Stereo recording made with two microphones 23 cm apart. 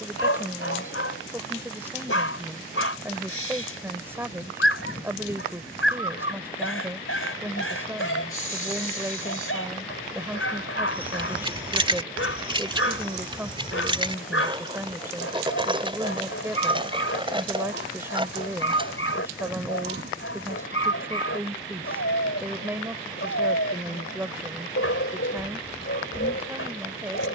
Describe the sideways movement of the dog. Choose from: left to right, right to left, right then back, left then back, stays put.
stays put.